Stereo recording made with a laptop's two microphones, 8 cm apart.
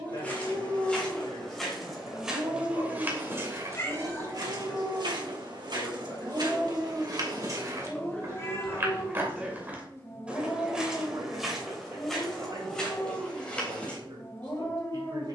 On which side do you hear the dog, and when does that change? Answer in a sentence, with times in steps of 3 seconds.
You can hear the dog on the right from 0 s, in the centre from 6 s and on the left from 9 s.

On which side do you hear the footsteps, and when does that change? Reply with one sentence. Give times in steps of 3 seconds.
You can hear the footsteps in the centre from 0 s, on the right from 3 s and in the centre from 9 s.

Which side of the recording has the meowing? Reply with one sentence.
You can hear the meowing on the left.